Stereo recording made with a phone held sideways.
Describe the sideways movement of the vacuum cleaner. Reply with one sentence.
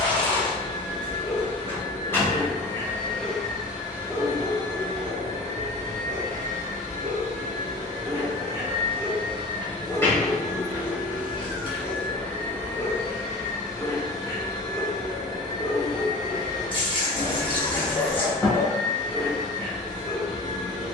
You can hear the vacuum cleaner go right and come back.